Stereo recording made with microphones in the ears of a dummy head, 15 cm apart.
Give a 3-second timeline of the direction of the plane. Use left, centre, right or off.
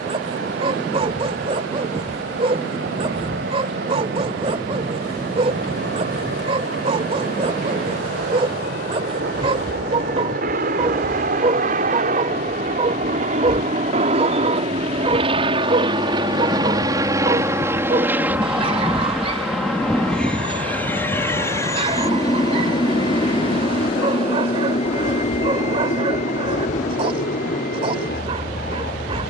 right, right, right, right, right, right, centre, left, left, left.